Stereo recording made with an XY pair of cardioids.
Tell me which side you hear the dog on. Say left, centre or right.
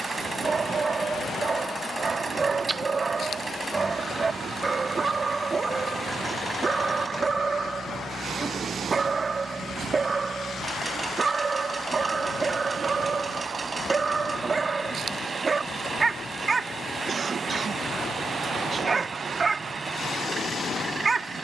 right.